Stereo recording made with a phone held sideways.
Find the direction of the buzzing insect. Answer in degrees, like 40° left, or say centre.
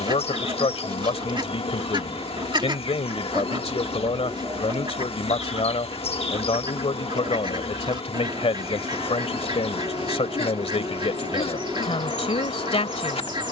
50° left.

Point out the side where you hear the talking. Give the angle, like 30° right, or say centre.
50° left.